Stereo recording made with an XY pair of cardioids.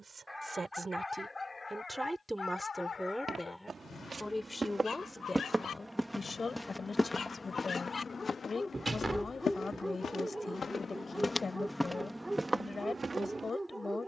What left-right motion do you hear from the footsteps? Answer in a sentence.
In this clip you hear the footsteps move from right to left and back again.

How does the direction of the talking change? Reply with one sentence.
You can hear the talking travel towards the left.